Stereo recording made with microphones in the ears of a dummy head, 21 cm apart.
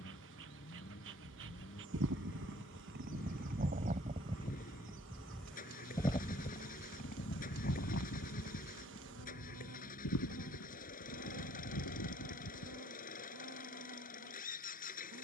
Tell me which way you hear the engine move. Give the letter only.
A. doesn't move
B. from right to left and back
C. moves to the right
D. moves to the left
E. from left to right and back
A.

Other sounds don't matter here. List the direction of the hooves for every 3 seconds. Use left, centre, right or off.
right, right, left, left, left.